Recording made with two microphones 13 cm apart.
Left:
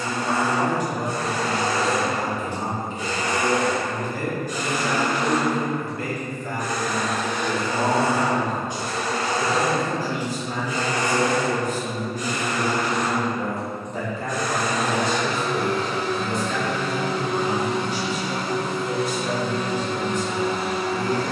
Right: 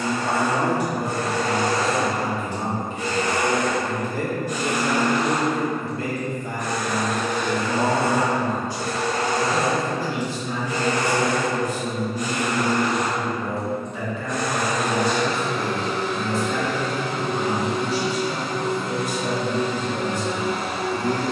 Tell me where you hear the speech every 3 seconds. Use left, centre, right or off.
right, right, centre, left, left, centre, right.